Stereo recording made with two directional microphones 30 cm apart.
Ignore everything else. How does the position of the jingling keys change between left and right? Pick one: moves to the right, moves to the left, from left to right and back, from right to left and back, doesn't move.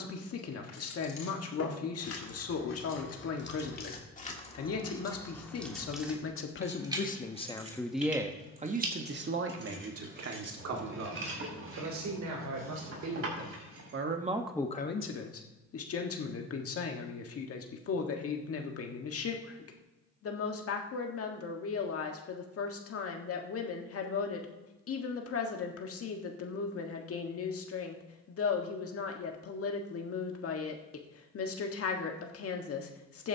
moves to the right.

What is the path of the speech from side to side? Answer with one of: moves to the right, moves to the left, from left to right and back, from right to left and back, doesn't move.
from left to right and back.